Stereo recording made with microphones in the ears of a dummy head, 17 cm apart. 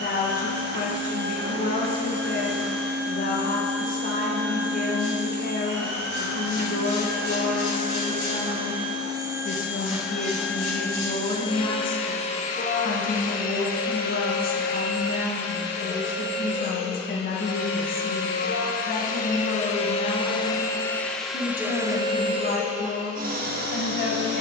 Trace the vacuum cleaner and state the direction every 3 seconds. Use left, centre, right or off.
right, right, right, centre, left, left, left, right.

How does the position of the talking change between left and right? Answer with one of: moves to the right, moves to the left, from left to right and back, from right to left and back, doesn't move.
doesn't move.